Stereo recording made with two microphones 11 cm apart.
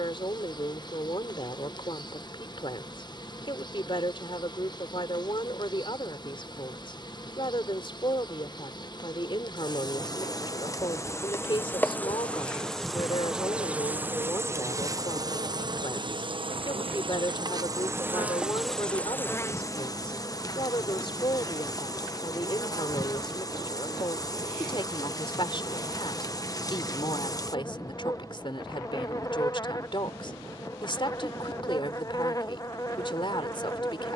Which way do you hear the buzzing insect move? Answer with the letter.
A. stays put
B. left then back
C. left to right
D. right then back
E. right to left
D.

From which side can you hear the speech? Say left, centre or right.
left.